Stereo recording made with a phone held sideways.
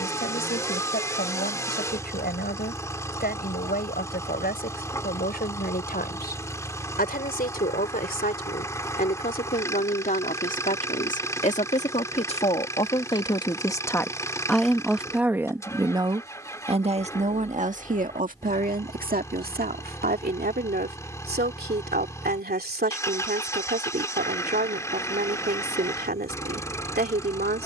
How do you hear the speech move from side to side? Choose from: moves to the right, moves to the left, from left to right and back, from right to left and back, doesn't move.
moves to the right.